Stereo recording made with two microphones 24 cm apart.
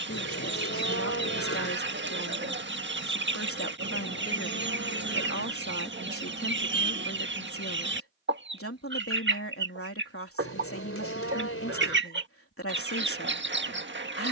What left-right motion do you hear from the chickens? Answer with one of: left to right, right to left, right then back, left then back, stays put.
stays put.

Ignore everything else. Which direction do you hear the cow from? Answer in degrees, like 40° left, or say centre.
70° left.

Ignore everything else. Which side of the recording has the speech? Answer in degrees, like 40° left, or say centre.
70° left.